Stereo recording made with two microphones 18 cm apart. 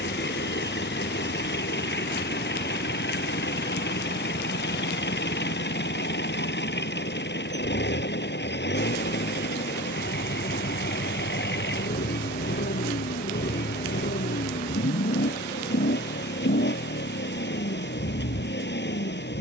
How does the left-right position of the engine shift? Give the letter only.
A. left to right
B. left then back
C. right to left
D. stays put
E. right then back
D.